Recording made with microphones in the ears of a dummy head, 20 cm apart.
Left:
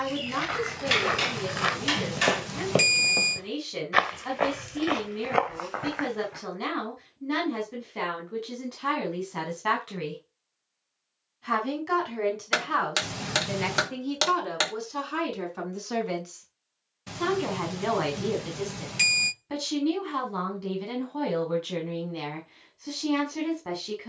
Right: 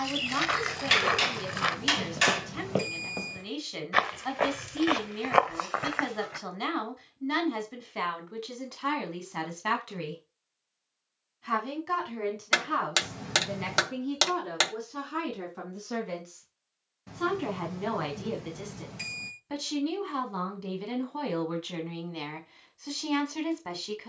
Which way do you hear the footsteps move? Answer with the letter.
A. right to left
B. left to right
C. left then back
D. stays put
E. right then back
C.